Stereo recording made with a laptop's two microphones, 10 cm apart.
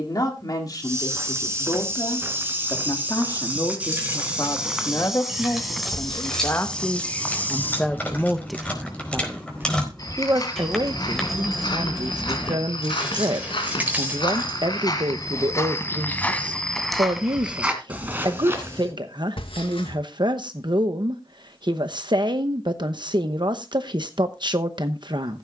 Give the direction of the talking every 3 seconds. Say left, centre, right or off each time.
left, left, centre, right, right, right, right, right, right.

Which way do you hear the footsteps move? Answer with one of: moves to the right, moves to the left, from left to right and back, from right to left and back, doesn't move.
from right to left and back.